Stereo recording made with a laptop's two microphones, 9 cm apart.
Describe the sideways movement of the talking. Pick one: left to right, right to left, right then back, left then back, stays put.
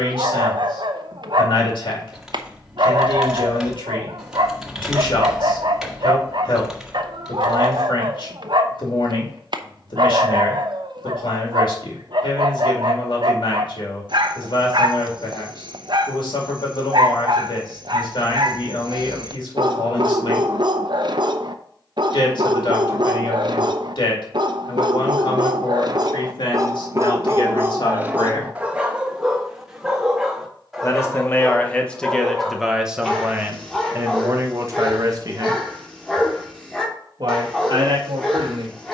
left to right.